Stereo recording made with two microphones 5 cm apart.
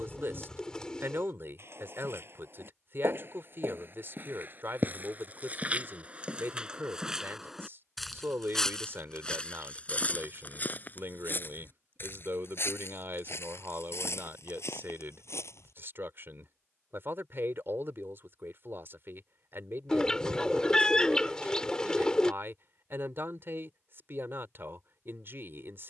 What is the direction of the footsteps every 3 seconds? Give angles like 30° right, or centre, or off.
50° right, 40° right, 10° right, 30° left, 60° left, 70° left, off, off, off.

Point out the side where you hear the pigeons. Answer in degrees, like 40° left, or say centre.
10° left.